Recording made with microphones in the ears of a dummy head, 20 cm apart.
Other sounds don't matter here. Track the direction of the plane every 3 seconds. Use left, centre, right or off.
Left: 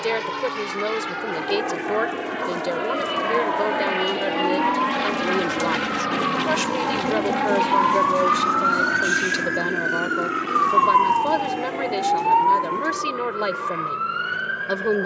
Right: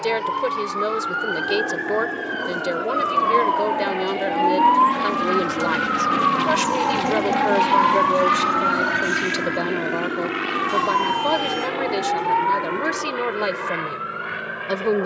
left, left, centre, right, right.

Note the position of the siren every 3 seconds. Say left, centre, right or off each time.
right, right, centre, left, left.